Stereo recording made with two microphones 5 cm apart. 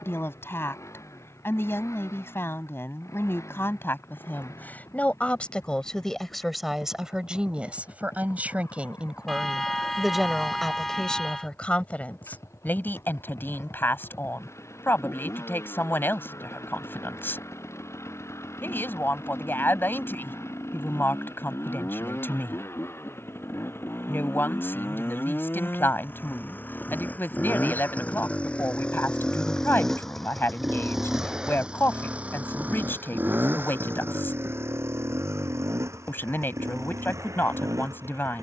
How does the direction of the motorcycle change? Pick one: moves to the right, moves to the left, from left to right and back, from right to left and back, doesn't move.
moves to the right.